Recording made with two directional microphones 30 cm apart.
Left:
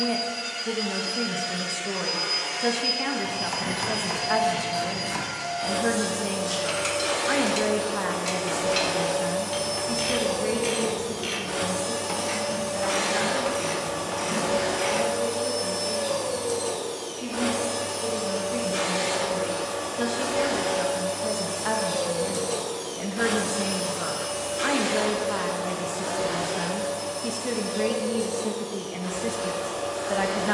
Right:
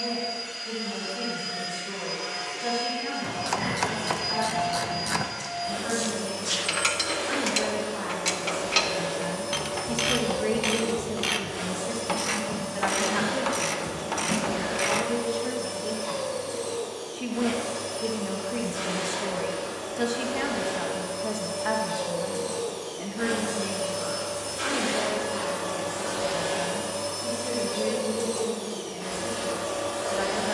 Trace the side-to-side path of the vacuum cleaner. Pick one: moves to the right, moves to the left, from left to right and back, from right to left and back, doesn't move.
moves to the right.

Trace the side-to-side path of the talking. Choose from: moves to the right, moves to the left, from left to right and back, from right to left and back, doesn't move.
from left to right and back.